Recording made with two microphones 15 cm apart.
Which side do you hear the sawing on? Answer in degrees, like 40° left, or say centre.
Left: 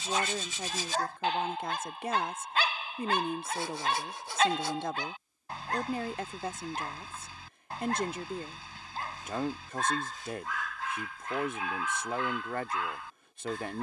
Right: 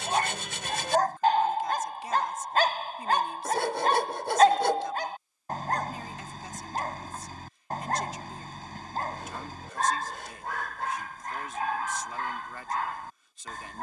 70° right.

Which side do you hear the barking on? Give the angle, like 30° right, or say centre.
50° right.